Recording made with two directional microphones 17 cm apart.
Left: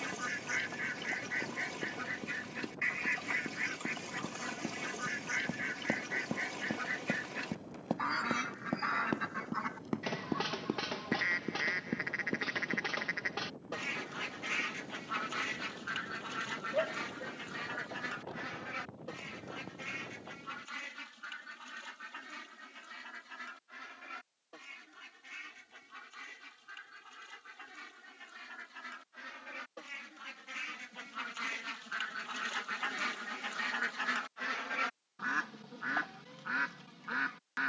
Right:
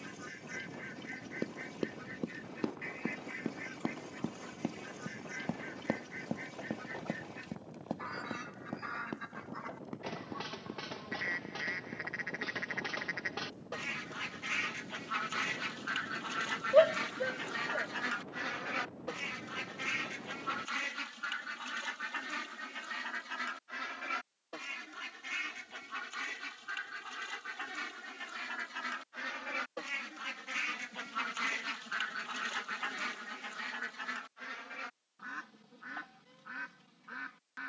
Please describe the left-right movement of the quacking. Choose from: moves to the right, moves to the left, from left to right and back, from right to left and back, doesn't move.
from left to right and back.